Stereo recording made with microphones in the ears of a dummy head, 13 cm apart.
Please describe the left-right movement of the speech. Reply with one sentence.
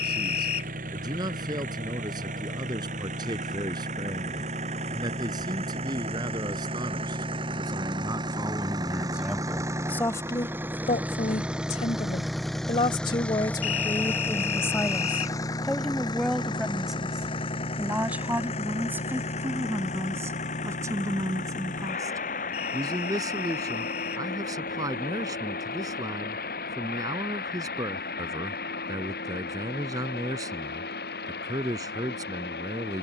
In this clip you hear the speech move from right to left and back again.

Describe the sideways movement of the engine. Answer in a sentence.
You can hear the engine move to the left.